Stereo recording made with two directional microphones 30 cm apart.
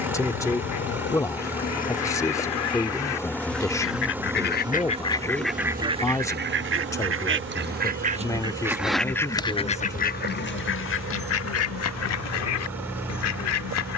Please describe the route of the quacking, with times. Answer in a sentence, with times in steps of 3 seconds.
You can hear the quacking on the left from 0 s, on the right from 6 s and on the left from 9 s.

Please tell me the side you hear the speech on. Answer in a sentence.
You can hear the speech in the centre.